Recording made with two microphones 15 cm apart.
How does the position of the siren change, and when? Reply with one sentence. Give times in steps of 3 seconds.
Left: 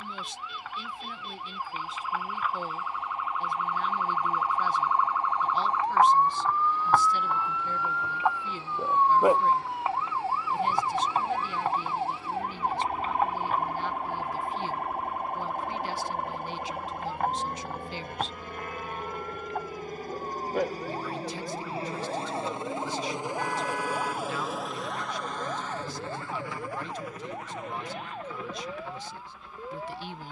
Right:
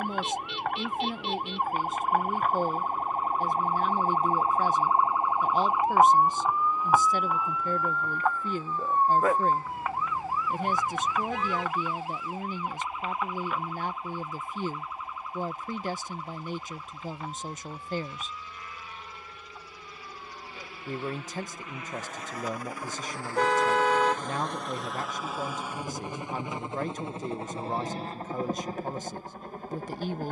You can hear the siren on the right from 0 s, in the centre from 6 s and on the left from 9 s.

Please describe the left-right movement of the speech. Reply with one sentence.
You can hear the speech stay in one place.